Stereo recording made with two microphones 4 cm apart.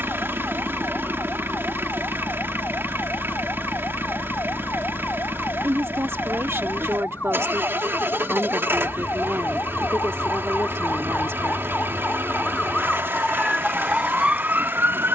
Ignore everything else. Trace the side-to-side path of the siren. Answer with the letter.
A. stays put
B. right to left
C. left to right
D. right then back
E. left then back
C.